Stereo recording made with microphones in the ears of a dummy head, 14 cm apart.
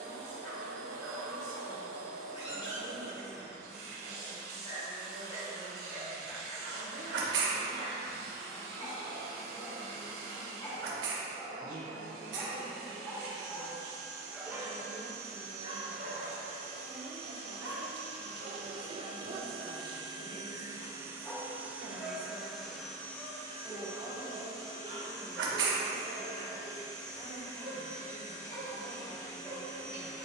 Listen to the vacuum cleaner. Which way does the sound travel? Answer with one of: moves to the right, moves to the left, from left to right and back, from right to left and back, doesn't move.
moves to the left.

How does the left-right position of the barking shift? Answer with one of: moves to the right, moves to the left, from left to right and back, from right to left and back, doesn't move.
from left to right and back.